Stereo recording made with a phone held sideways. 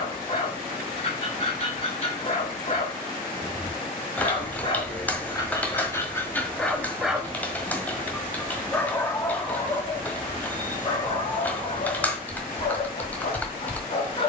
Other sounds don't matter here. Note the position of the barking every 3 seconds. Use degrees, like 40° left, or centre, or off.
40° left, 30° left, 10° left, 30° left, 40° left.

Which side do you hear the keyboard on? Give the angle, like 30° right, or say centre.
10° left.